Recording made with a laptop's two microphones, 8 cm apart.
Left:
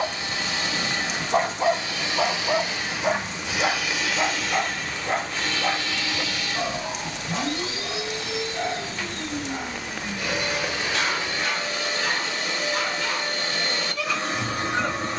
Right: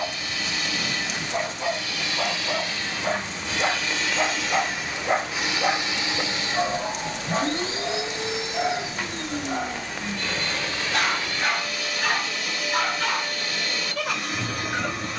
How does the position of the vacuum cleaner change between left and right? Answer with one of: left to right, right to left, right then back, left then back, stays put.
right then back.